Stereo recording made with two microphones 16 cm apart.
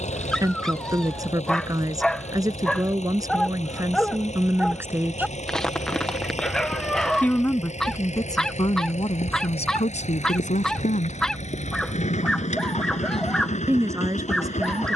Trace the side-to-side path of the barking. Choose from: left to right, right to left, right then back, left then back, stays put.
stays put.